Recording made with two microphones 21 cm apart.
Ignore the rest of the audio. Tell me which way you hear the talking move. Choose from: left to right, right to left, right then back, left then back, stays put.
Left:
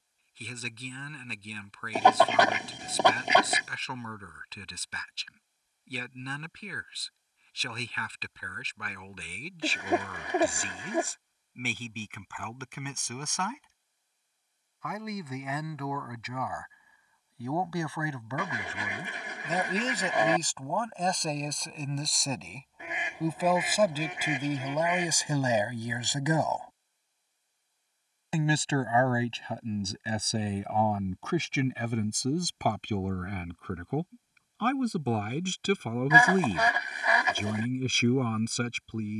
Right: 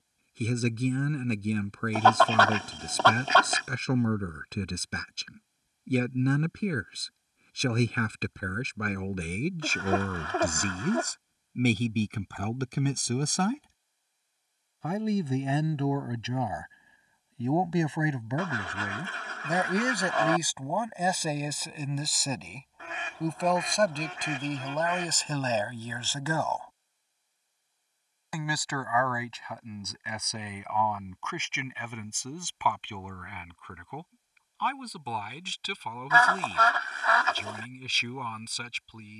right to left.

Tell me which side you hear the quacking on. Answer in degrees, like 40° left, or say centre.
10° left.